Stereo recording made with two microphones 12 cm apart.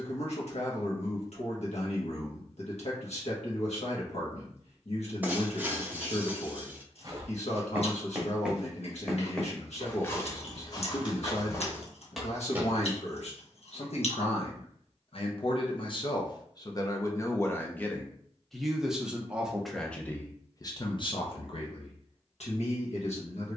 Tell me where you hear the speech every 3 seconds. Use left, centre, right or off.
left, left, left, left, left, left, centre, left.